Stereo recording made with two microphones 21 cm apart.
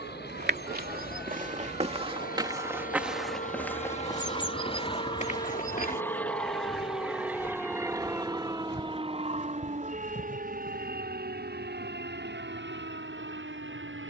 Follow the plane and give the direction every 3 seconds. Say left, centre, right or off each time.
left, left, centre, right, right.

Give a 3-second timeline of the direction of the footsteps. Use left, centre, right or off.
right, left, left, left, off.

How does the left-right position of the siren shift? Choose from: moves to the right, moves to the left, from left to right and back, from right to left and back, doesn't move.
moves to the right.